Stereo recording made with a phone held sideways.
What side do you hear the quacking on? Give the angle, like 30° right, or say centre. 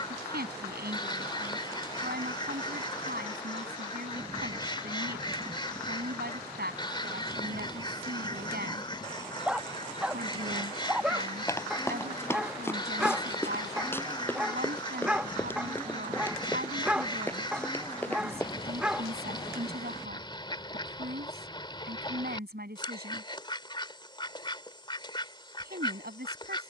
30° left.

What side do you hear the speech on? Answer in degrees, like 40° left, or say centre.
80° right.